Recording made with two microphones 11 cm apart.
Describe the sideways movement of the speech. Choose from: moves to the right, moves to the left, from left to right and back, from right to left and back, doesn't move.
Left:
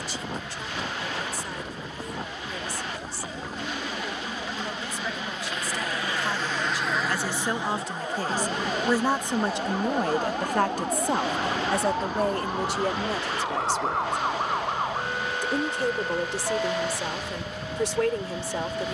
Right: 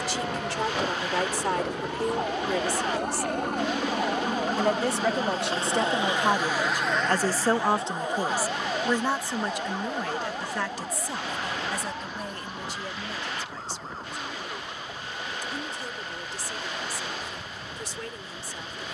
moves to the left.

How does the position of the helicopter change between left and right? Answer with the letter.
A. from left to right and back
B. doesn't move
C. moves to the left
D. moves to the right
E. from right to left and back
C.